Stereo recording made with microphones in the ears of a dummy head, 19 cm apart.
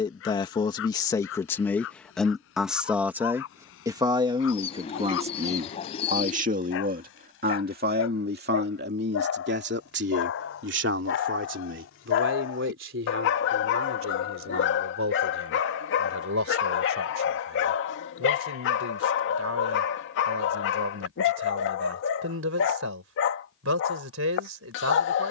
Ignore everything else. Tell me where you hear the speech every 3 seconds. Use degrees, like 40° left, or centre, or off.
10° left, 20° right, 40° right, 50° right, 60° right, 60° right, 70° right, 70° right, 70° right.